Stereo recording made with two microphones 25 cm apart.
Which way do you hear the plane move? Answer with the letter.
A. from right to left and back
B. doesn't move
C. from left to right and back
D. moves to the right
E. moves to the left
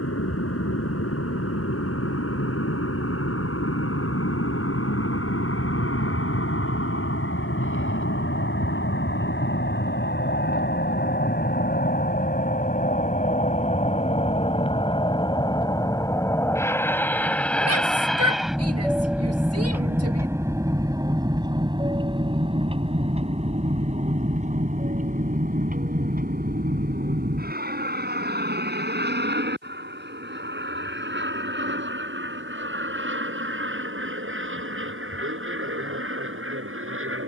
D.